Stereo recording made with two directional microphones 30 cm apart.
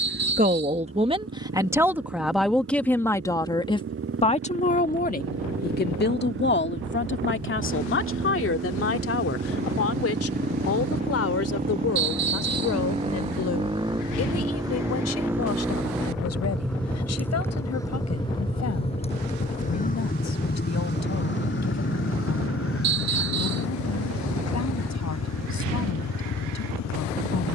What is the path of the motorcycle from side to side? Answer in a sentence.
In this clip you hear the motorcycle travel towards the left.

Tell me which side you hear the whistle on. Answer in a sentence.
You can hear the whistle on the right.